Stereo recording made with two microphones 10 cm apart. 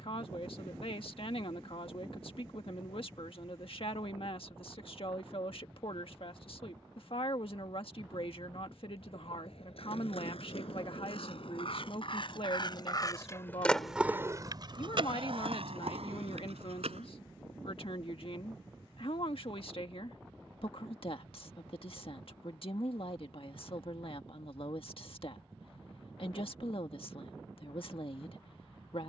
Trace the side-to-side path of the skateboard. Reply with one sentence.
In this clip you hear the skateboard go from the left side to the right.